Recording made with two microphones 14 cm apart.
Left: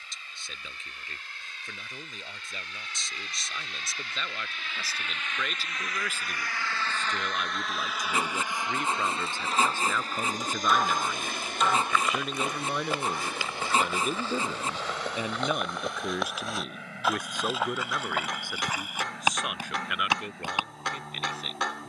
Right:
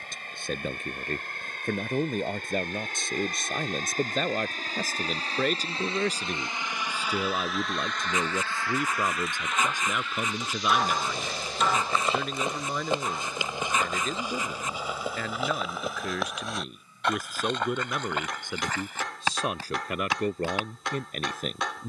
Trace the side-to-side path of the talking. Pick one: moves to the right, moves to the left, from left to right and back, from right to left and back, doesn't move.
from right to left and back.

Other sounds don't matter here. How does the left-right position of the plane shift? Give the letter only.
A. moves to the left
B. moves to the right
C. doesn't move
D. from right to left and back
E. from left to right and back
A.